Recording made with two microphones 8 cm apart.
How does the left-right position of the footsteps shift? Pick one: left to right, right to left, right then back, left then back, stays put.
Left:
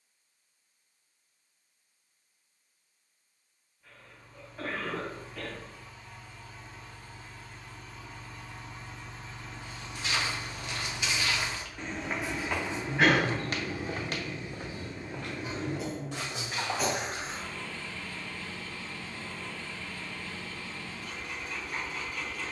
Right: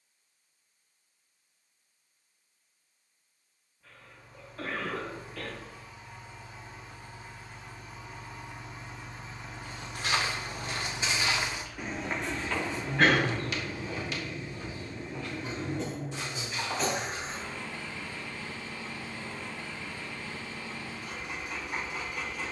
right to left.